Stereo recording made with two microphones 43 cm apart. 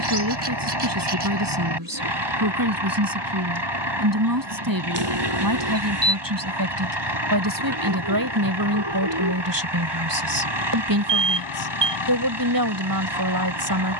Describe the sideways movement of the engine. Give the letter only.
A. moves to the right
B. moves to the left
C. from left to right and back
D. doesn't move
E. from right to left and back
D.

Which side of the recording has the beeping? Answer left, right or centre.
right.